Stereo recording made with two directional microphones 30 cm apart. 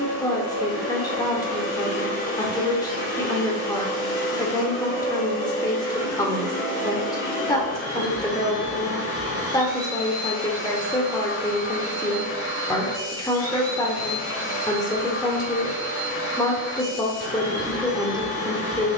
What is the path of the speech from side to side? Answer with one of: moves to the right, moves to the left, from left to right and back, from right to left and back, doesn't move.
doesn't move.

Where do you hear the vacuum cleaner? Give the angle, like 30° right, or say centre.
50° left.